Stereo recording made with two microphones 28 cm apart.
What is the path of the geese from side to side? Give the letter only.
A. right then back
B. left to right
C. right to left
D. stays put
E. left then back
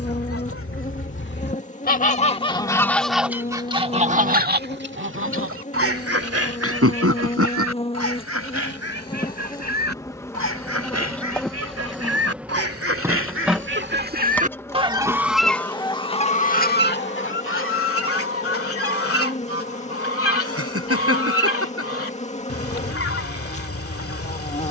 A.